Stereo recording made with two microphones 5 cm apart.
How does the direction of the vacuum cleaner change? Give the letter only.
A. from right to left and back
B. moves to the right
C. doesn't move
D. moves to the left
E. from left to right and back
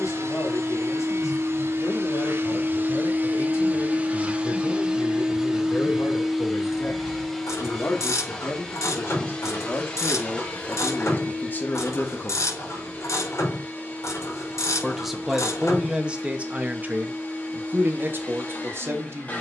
D.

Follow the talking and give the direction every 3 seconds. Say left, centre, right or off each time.
left, left, left, left, left, right, right.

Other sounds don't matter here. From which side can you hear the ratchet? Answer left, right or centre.
left.